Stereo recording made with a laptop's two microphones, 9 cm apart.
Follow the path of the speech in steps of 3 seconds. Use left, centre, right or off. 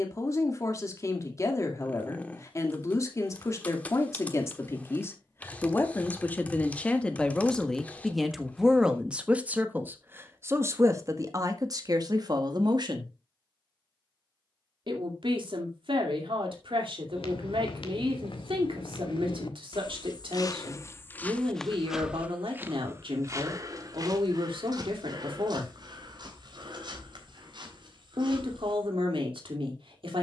left, left, centre, right, right, right, right, right, right, right.